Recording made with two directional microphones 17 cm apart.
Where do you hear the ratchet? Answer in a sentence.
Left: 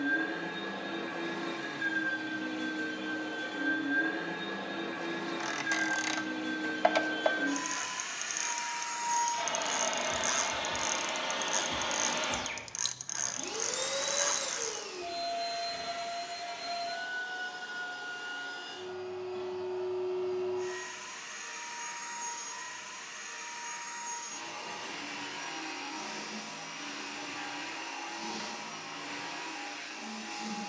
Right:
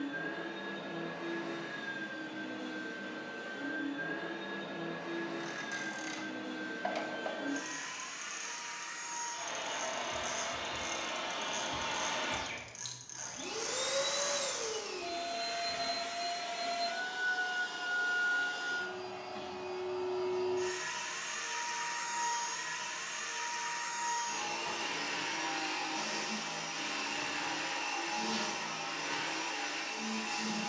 You can hear the ratchet on the left.